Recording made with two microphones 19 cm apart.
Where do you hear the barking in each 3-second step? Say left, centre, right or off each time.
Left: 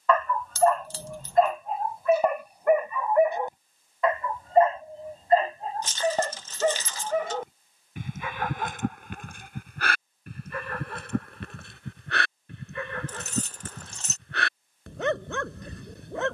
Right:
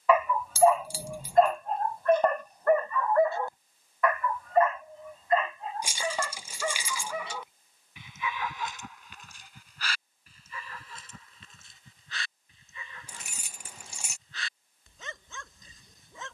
centre, left, left, left, left, left.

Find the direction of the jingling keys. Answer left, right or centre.
centre.